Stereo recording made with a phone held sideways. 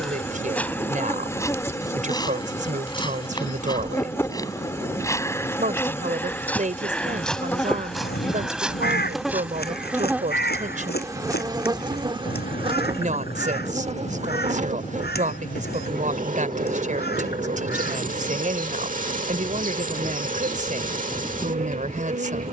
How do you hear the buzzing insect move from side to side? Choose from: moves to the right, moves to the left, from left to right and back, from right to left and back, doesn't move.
moves to the right.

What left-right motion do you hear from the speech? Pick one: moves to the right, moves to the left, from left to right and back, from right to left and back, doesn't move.
doesn't move.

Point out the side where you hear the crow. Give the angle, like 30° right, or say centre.
80° left.